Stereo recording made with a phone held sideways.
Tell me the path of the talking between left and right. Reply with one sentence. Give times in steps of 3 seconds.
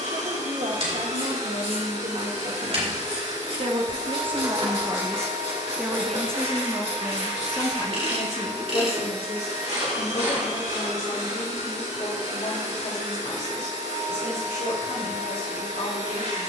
In this clip you hear the talking on the right from 0 s and on the left from 6 s.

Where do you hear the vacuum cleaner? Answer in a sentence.
You can hear the vacuum cleaner on the right.